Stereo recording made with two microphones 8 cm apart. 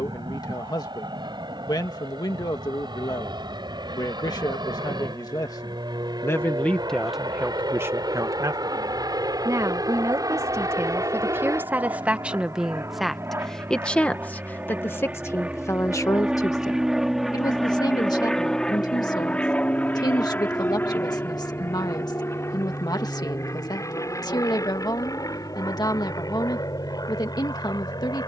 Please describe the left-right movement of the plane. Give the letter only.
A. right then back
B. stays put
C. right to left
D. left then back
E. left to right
C.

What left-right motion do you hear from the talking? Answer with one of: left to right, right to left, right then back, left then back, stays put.
right then back.